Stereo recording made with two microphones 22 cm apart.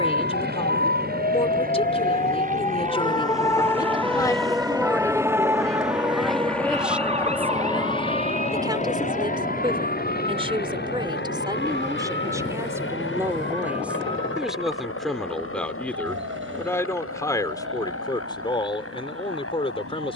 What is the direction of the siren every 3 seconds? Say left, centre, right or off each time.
left, centre, right, right, right, right, right.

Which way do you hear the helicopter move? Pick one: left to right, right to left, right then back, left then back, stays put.
right to left.